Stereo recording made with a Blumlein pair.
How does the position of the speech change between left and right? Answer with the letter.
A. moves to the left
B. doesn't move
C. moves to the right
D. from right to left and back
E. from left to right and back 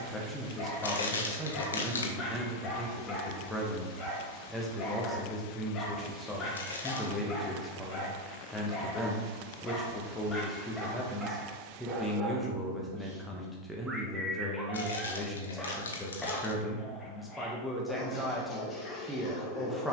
B.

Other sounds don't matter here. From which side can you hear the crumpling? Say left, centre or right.
left.